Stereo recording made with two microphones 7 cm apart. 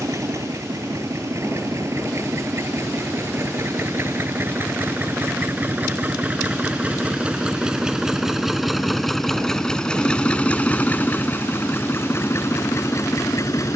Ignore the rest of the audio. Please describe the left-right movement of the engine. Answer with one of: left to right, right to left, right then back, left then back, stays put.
right to left.